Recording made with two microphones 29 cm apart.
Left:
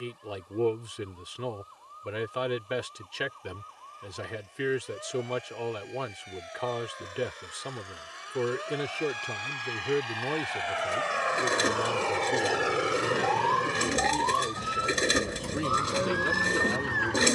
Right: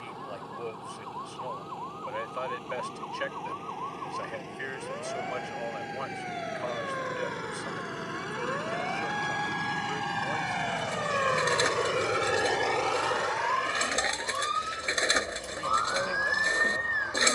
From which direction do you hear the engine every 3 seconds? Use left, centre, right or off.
right, right, right, right, left, left.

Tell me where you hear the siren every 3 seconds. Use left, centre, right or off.
right, right, right, right, centre, left.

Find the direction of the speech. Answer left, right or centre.
left.